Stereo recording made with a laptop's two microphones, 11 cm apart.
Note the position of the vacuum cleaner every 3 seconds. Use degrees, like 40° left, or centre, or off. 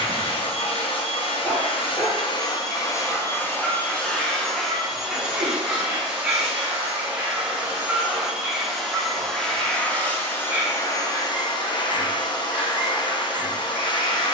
50° left, 10° left, 10° right, 20° left, 40° left.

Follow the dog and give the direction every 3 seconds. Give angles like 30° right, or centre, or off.
10° left, centre, 10° right, 10° right, 10° right.